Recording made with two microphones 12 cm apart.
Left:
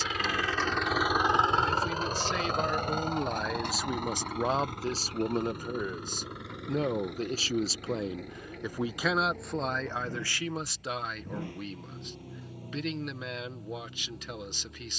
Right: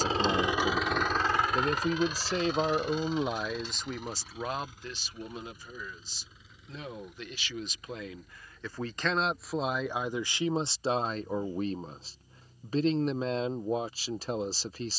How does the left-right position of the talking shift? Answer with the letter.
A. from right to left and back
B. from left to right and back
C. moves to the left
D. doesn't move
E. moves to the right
A.